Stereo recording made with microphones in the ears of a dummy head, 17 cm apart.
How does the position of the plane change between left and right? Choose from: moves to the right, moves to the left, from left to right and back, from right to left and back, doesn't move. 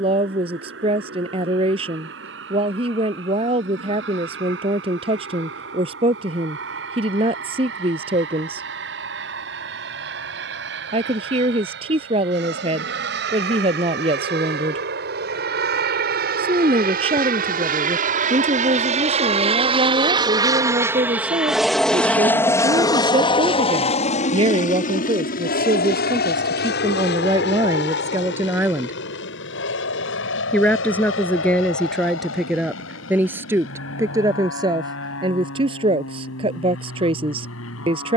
moves to the left.